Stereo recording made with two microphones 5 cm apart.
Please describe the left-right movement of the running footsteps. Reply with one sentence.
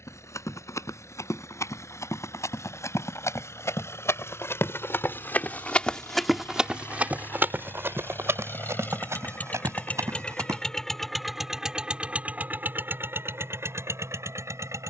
In this clip you hear the running footsteps go from the left side to the right.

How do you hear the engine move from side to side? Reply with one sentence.
You can hear the engine move to the right.